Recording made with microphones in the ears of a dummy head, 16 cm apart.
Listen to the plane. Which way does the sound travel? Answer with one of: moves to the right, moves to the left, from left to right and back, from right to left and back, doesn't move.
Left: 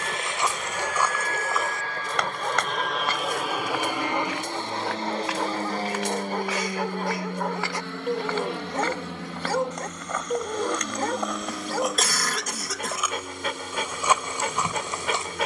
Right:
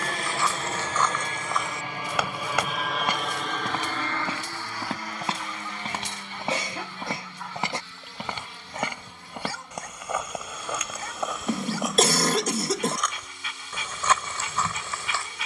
moves to the left.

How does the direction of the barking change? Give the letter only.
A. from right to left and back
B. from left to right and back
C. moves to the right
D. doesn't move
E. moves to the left
D.